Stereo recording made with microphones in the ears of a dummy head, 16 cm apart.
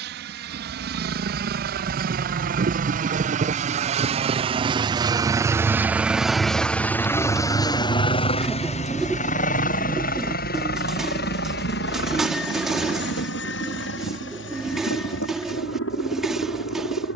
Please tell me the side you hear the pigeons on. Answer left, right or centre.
centre.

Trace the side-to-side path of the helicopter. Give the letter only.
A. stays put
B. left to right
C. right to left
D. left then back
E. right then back
C.